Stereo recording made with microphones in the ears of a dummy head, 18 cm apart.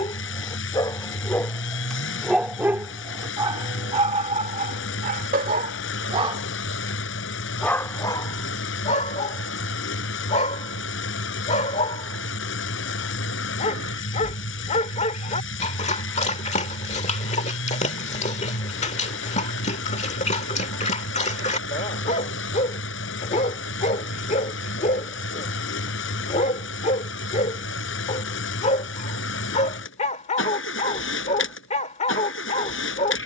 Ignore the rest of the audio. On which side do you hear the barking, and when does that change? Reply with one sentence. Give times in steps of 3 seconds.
You can hear the barking in the centre from 0 s, on the right from 3 s, in the centre from 6 s and on the left from 9 s.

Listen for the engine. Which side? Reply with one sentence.
You can hear the engine on the left.